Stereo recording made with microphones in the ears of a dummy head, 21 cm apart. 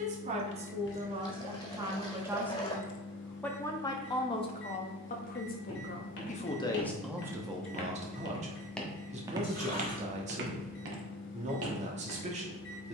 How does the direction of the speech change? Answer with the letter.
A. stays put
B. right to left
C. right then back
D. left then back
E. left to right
D.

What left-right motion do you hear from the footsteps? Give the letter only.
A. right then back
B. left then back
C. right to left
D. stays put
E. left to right
E.